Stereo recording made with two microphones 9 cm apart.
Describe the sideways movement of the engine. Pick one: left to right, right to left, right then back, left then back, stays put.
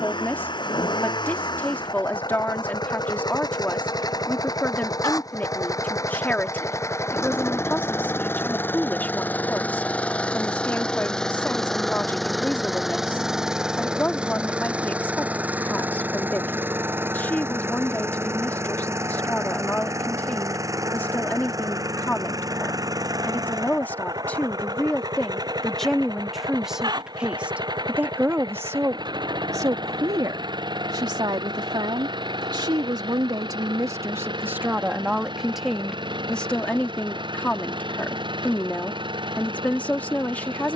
left to right.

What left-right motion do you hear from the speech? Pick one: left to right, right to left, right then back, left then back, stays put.
right then back.